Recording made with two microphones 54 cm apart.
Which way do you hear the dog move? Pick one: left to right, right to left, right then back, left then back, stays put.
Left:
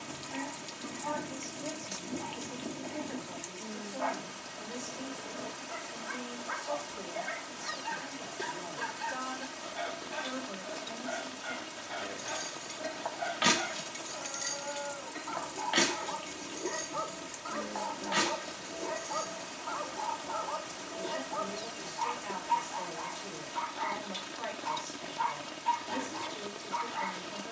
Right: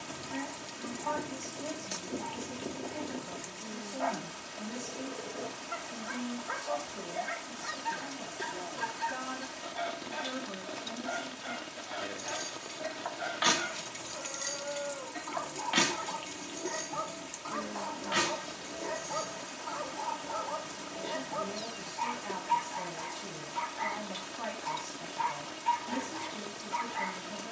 left to right.